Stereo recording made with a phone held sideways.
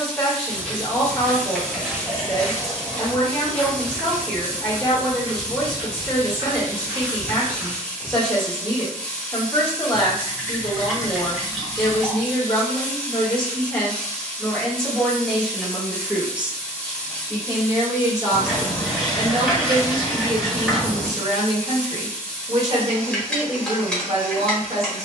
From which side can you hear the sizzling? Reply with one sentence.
In this clip you hear the sizzling in the centre.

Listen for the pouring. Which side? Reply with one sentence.
You can hear the pouring in the centre.